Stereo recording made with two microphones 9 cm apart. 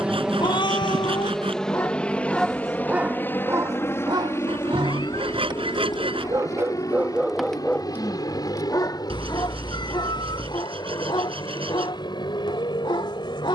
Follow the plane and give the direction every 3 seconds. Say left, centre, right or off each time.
centre, left, left, left, left.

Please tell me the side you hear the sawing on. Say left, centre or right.
right.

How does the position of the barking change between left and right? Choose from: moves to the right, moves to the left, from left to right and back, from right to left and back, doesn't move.
from left to right and back.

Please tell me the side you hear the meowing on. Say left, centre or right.
left.